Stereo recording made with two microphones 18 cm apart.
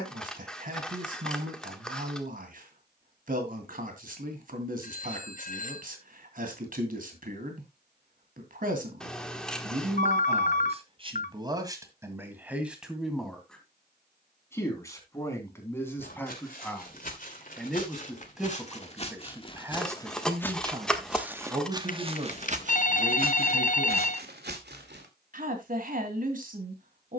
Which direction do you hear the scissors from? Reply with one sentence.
You can hear the scissors in the centre.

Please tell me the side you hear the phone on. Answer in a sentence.
You can hear the phone on the left.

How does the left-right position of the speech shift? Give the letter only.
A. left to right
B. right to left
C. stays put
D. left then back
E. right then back
D.